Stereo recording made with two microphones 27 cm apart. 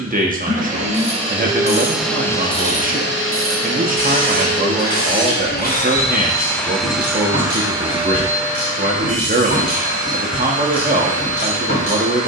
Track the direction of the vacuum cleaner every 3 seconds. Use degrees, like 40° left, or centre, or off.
10° right, 50° left, 10° right, 30° right.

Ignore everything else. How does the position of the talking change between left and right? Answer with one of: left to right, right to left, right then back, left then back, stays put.
stays put.